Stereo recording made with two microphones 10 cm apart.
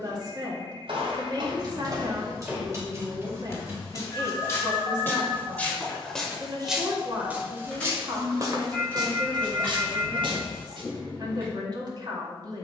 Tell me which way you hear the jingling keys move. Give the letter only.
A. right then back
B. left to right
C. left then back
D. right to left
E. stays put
D.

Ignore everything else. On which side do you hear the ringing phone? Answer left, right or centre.
left.